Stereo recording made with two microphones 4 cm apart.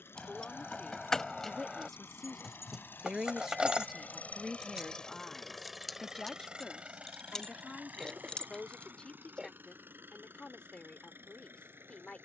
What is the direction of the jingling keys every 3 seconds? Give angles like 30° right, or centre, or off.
10° left, 10° right, 20° left, off.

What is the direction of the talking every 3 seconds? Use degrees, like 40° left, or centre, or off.
10° left, centre, 20° left, 30° left.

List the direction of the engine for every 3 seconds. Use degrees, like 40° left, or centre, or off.
70° left, 30° left, 40° right, 60° right.